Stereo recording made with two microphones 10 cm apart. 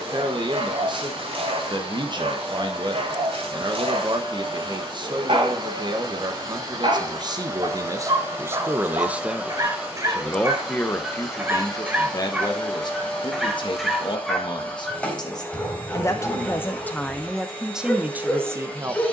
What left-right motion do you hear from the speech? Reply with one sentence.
In this clip you hear the speech go left and come back.